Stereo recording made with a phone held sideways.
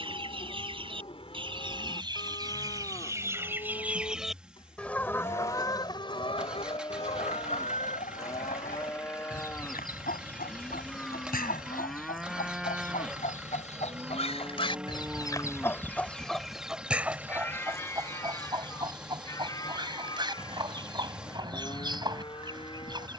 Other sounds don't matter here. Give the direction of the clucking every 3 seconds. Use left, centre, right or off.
right, centre, left, left, left, centre, right, right.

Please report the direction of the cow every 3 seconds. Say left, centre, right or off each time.
left, left, left, centre, centre, centre, left, left.